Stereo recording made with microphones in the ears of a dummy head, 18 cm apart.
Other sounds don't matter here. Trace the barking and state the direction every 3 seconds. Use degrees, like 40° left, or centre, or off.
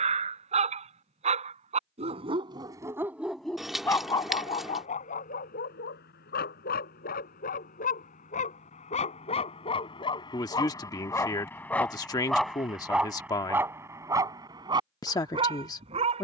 30° right, 30° left, 50° left, 20° left, 10° right, 30° right.